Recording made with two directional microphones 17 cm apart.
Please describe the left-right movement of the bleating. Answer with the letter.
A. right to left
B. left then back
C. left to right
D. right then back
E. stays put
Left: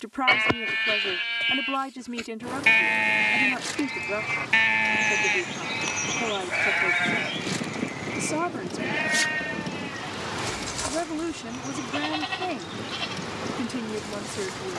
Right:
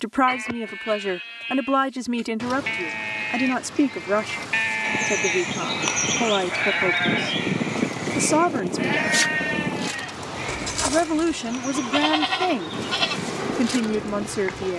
C.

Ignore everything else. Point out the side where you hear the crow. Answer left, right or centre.
right.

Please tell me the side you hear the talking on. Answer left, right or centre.
right.